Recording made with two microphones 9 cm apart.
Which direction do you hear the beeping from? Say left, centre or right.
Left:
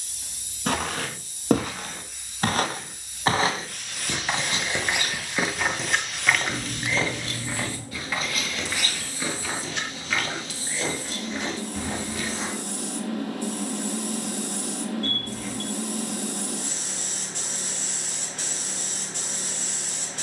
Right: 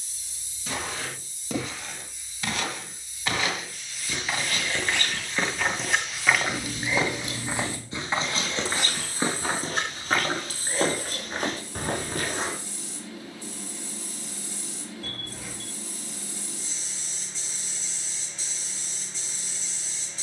centre.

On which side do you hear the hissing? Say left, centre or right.
left.